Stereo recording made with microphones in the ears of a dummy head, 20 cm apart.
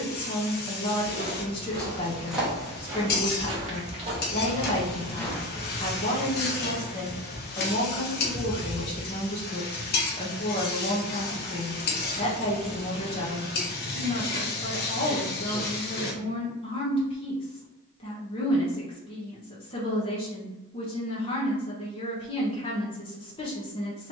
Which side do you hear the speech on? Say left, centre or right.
left.